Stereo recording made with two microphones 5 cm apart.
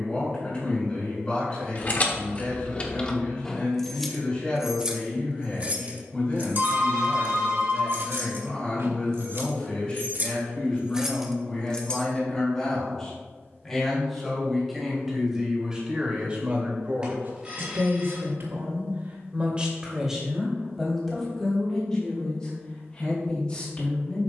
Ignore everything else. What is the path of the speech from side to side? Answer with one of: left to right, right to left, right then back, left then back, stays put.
right then back.